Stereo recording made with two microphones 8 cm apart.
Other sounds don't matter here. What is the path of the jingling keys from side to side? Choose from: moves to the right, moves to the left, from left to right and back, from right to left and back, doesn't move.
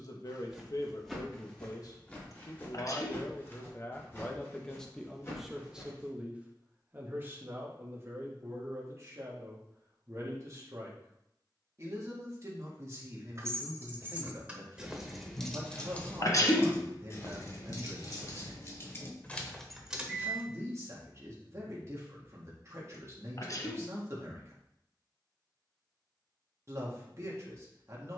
from right to left and back.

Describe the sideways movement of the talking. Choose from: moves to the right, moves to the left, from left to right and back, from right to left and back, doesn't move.
moves to the right.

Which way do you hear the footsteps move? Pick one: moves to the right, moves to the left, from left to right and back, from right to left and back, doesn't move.
moves to the left.